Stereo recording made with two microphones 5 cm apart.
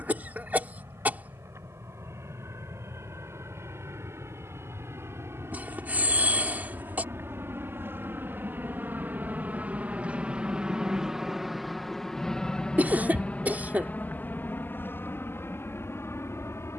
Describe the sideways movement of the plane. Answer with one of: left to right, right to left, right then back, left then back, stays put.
right to left.